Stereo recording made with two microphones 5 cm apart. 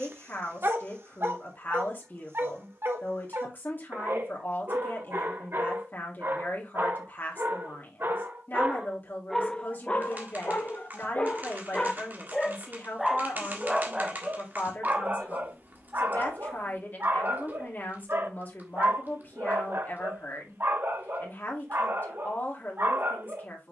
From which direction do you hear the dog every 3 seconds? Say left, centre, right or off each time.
right, right, right, left, centre, right, right, right.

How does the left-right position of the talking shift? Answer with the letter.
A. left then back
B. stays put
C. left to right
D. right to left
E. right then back
B.